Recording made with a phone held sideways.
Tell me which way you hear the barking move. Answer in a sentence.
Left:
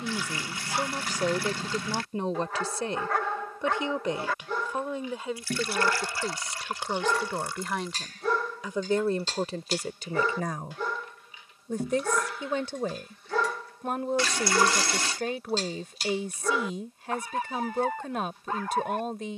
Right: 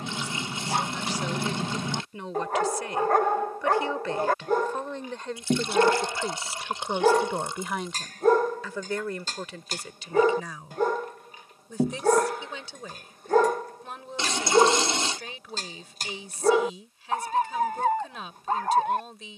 You can hear the barking stay in one place.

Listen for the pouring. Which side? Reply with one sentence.
In this clip you hear the pouring on the right.